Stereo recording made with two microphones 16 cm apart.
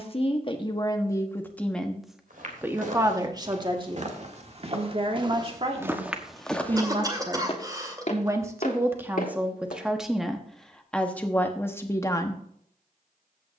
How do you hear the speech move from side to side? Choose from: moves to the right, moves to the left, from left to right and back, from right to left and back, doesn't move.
from left to right and back.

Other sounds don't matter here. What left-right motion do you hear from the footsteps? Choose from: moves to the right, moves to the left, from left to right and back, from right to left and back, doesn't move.
moves to the left.